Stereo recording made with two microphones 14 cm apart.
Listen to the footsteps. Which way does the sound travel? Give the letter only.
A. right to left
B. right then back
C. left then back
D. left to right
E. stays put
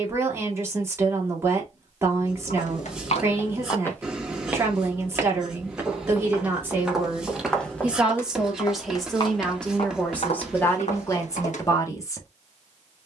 B.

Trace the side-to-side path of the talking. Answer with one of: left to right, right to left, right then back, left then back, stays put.
right to left.